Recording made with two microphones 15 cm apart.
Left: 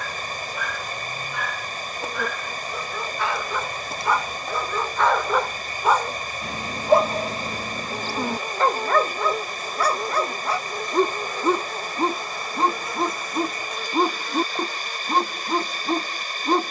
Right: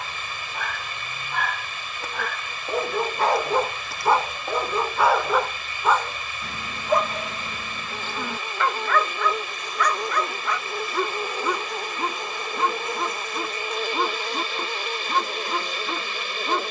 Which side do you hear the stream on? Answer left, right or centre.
left.